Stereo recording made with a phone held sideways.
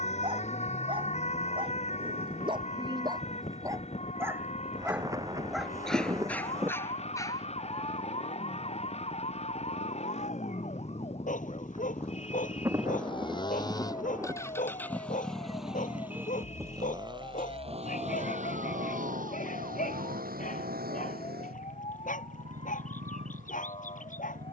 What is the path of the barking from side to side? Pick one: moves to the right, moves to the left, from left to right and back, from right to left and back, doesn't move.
moves to the left.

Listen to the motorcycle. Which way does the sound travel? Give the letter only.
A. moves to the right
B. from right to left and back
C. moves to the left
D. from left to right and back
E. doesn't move
A.